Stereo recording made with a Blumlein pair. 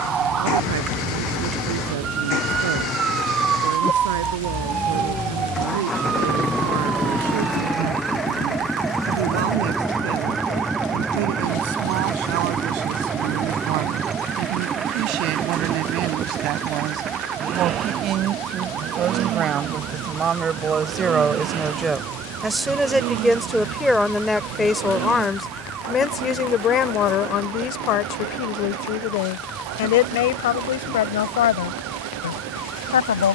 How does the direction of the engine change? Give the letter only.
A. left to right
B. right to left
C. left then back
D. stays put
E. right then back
A.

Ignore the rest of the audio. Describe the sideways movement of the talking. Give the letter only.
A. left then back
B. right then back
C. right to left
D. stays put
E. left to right
C.